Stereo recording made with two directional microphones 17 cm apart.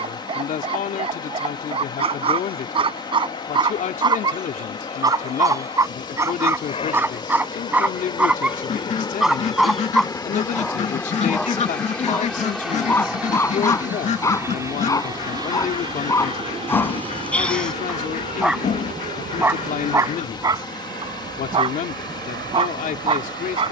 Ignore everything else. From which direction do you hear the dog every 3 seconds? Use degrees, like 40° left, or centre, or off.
30° right, 20° right, 10° right, centre, 10° left, 10° left, 10° right, 30° right.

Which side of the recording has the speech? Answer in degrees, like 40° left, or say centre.
50° left.